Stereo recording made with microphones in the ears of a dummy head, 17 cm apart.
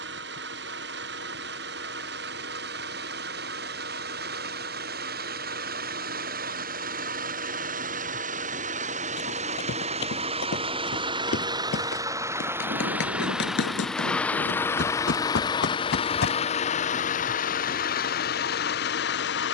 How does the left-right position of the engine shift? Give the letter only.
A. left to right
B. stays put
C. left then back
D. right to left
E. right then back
D.